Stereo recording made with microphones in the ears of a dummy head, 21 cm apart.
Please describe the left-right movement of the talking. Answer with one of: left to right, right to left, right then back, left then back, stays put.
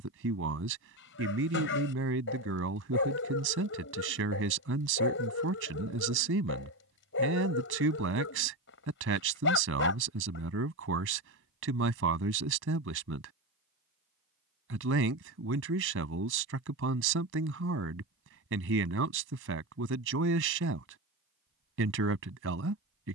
stays put.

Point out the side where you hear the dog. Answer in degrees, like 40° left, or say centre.
50° left.